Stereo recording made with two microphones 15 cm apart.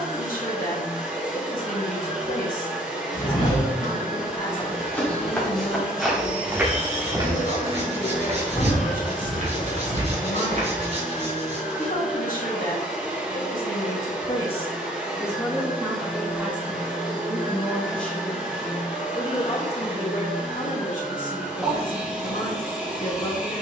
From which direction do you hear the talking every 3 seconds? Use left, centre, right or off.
left, left, left, left, left, centre, left, left.